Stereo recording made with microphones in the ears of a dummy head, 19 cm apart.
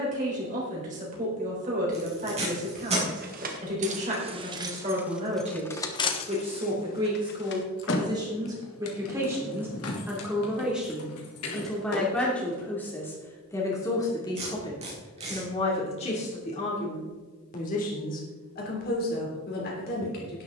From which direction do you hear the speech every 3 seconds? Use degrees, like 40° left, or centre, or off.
40° right, 30° right, 20° right, 10° right, 10° left, 30° left, 40° left.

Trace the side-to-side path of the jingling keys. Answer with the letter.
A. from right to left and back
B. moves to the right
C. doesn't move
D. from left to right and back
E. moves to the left
E.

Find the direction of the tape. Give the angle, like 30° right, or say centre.
30° right.